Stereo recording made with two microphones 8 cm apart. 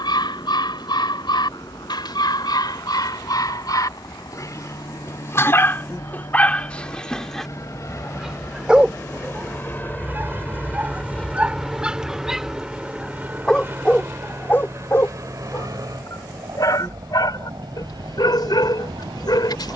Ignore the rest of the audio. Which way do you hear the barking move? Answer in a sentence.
You can hear the barking go right and come back.